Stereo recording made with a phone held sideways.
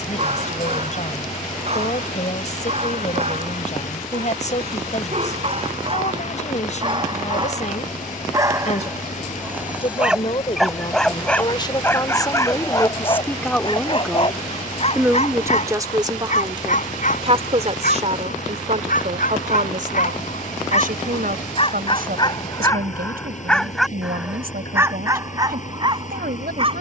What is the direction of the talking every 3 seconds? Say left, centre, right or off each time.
left, left, left, left, centre, right, right, right, right.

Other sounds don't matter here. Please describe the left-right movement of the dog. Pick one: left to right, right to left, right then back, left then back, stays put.
left then back.